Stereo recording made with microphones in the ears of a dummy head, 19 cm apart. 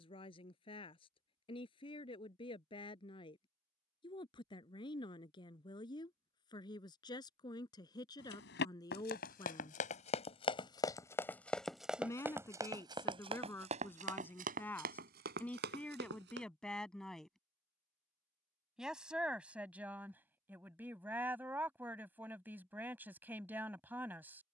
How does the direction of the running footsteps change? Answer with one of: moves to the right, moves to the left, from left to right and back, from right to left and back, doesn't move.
moves to the right.